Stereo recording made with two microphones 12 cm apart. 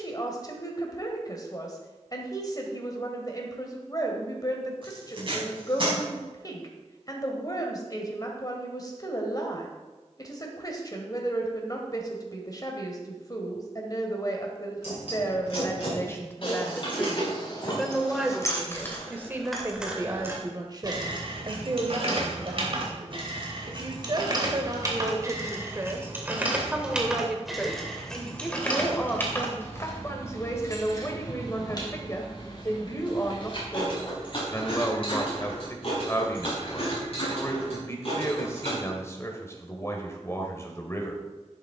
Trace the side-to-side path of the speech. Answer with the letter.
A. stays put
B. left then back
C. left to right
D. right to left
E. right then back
E.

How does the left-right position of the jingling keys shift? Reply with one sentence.
In this clip you hear the jingling keys move from left to right and back again.